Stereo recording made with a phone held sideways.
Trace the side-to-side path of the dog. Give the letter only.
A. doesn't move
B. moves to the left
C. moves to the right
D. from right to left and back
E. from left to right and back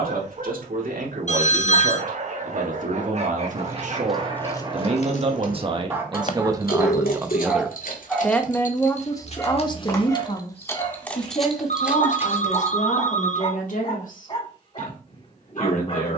B.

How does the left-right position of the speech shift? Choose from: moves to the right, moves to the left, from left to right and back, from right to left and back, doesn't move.
moves to the left.